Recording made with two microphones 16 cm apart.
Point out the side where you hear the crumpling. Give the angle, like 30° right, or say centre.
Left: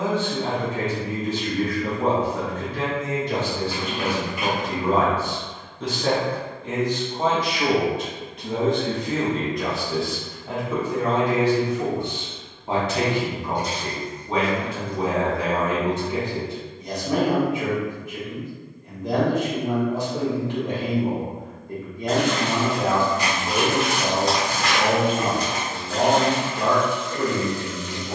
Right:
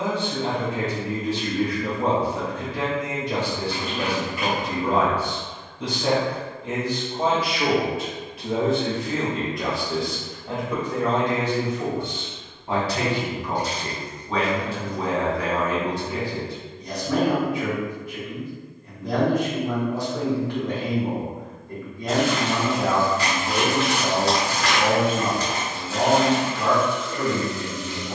20° left.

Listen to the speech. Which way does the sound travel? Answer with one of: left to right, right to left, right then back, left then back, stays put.
right to left.